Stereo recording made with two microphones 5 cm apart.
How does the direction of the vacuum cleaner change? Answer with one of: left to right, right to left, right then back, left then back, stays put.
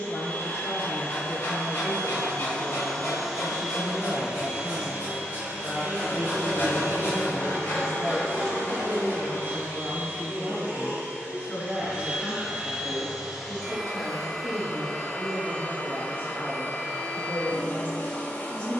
right then back.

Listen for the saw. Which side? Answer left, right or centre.
left.